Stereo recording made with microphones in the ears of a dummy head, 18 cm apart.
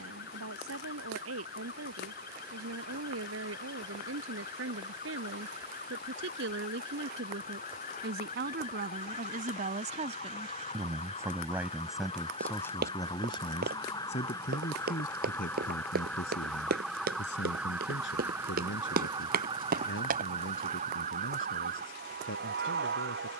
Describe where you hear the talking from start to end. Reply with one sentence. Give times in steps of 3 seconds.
You can hear the talking on the right from 0 s and on the left from 12 s.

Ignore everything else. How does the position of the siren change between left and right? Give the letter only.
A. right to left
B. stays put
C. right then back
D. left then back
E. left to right
E.